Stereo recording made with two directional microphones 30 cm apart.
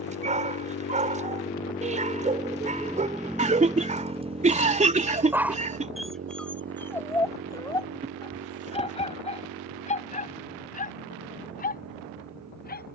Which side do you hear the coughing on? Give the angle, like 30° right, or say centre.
20° right.